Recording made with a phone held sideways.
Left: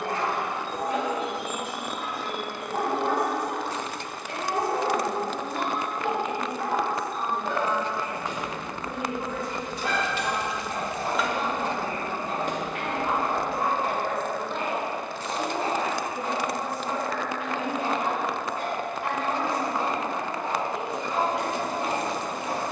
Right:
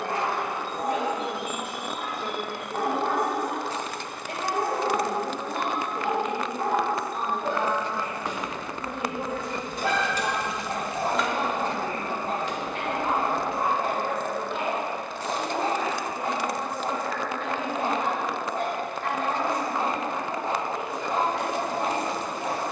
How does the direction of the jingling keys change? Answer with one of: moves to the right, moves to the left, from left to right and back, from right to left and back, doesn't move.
moves to the left.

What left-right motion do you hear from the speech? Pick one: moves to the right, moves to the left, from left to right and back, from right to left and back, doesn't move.
moves to the left.